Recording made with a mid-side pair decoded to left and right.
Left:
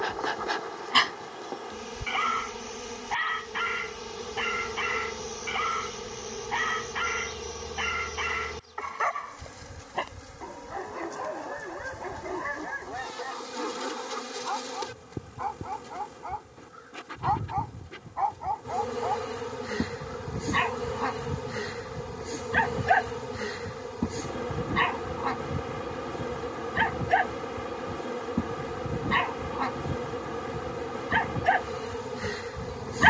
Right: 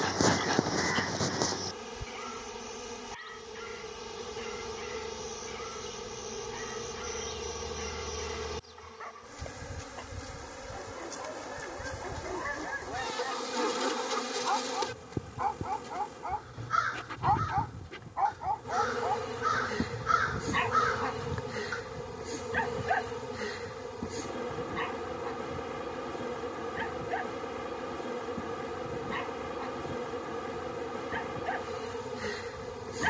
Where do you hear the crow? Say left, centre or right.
right.